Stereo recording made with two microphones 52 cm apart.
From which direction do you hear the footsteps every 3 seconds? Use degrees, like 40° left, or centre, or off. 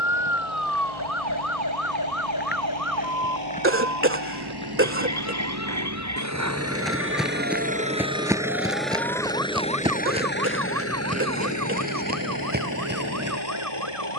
20° left, 10° left, centre, 10° right, 20° right.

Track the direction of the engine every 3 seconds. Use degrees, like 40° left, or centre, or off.
60° right, 50° right, 20° right, 20° left, 40° left.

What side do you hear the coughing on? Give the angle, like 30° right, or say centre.
20° right.